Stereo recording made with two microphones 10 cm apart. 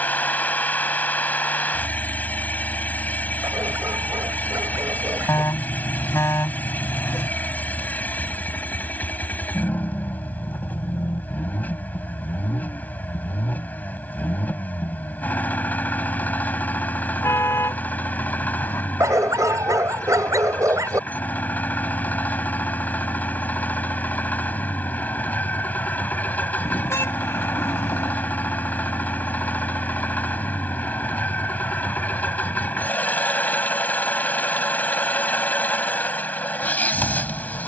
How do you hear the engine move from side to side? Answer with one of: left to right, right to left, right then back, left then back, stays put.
stays put.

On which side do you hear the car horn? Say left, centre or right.
left.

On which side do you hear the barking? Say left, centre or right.
right.